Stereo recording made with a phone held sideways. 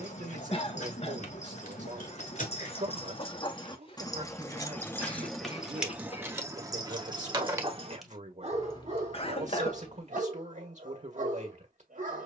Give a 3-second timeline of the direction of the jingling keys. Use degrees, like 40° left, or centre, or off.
60° left, 20° left, 10° right, 50° left.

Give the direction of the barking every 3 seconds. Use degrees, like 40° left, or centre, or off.
50° left, 10° left, 30° right, 60° right.